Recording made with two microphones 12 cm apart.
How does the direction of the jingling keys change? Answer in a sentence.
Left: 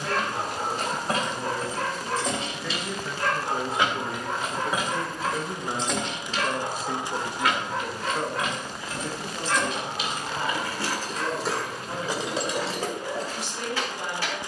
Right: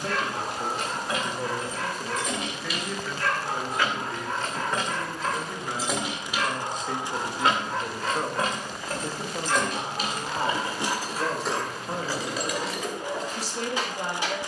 You can hear the jingling keys move from left to right and back again.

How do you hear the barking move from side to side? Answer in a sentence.
You can hear the barking go from the left side to the right.